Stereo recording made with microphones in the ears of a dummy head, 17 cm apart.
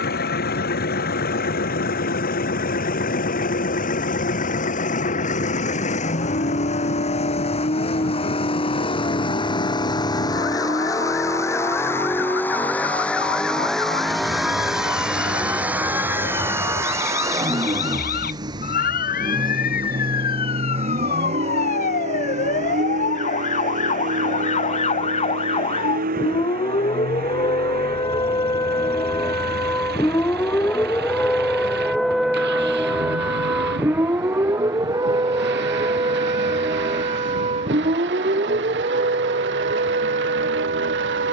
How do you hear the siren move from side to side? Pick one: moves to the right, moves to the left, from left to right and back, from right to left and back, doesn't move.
moves to the right.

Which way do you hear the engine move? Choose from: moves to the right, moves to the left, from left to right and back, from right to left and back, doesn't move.
moves to the right.